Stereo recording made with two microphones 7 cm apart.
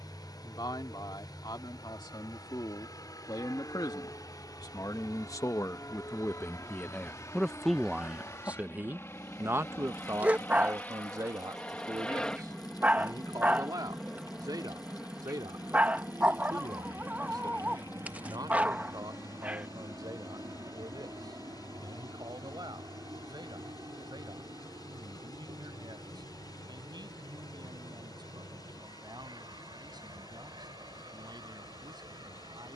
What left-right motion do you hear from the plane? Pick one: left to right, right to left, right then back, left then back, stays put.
left to right.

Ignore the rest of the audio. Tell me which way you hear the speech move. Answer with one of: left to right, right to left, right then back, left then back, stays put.
left to right.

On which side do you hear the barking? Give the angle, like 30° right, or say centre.
20° right.